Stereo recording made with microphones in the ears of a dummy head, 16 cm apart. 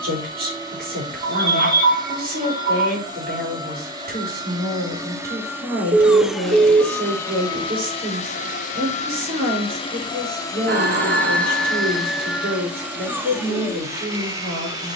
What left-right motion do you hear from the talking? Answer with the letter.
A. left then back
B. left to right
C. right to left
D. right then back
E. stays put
E.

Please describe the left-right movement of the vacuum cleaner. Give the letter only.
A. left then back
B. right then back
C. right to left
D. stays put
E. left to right
A.